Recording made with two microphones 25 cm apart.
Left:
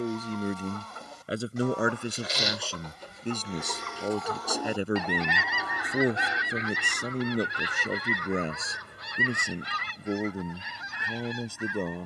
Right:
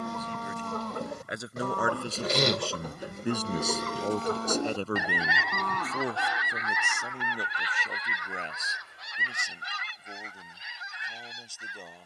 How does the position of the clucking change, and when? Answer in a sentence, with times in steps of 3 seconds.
In this clip you hear the clucking on the right from 0 s and on the left from 6 s.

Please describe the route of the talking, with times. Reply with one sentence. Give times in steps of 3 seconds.
In this clip you hear the talking on the left from 0 s, in the centre from 3 s and on the left from 6 s.